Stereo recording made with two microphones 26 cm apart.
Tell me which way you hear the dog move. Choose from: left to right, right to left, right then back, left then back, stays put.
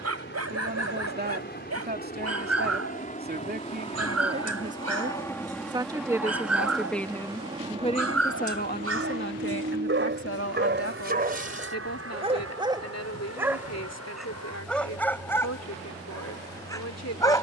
right to left.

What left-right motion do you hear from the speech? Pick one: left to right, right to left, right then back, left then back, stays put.
right to left.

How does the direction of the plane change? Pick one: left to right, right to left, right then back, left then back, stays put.
left to right.